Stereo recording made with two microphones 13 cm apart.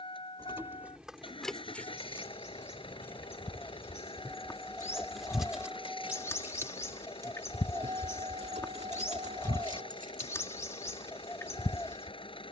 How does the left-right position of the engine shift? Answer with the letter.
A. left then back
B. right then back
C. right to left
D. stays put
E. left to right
D.